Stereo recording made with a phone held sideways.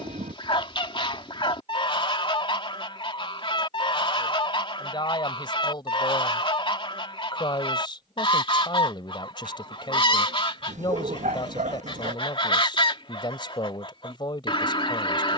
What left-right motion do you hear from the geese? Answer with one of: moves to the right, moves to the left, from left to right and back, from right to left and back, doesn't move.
doesn't move.